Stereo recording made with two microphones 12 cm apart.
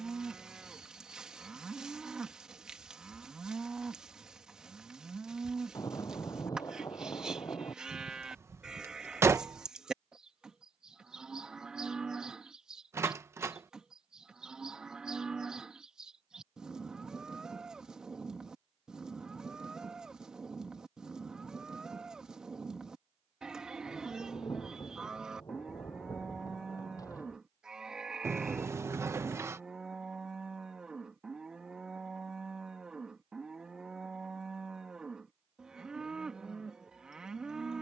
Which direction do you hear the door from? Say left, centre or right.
right.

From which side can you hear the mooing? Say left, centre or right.
centre.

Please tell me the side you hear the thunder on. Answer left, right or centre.
left.